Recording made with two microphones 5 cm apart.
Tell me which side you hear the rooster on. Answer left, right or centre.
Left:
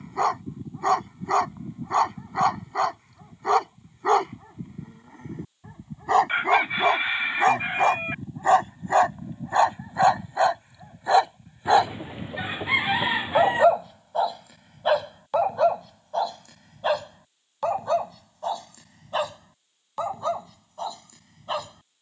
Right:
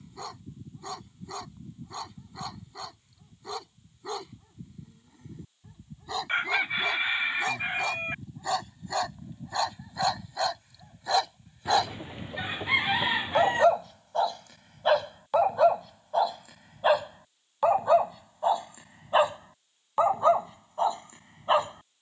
centre.